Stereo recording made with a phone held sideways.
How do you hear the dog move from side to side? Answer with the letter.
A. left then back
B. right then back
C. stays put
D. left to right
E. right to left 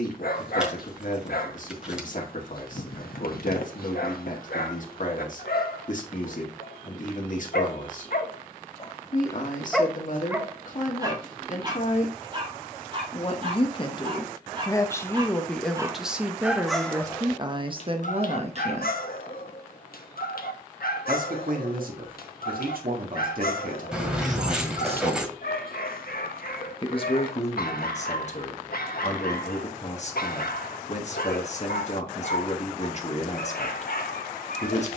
B.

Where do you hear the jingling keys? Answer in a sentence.
You can hear the jingling keys in the centre.